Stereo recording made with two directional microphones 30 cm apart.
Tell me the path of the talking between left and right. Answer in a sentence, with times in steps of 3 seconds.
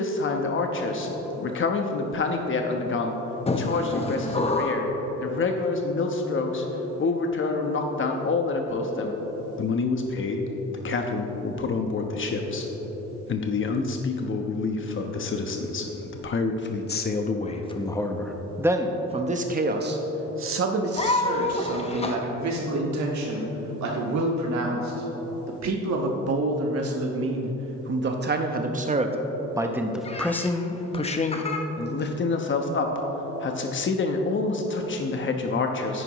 In this clip you hear the talking on the left from 0 s, on the right from 18 s and on the left from 30 s.